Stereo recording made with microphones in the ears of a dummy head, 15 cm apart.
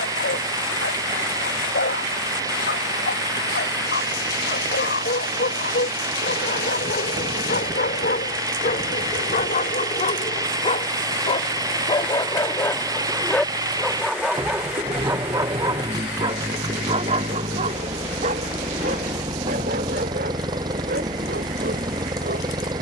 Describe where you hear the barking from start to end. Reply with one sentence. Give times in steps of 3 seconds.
You can hear the barking on the left from 0 s, in the centre from 12 s and on the right from 15 s.